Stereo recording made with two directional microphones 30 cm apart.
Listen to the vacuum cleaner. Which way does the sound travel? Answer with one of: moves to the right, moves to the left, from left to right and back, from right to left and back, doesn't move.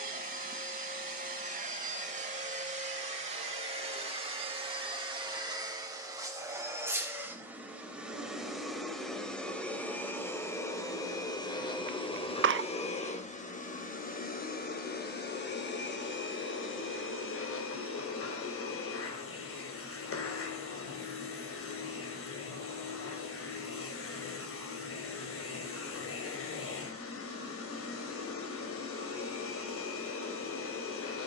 moves to the left.